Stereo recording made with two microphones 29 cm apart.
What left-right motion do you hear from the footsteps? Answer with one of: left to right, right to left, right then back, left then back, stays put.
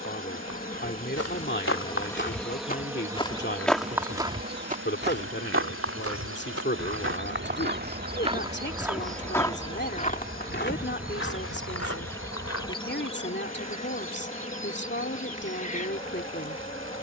right then back.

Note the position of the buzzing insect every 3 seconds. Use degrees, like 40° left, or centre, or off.
20° left, 30° right, 40° right, 10° right, 20° left, 20° left.